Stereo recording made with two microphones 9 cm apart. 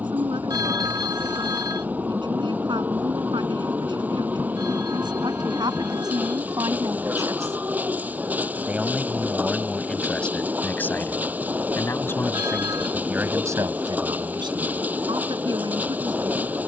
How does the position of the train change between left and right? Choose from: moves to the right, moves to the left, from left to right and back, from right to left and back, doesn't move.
doesn't move.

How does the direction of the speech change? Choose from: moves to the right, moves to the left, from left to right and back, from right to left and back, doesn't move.
from right to left and back.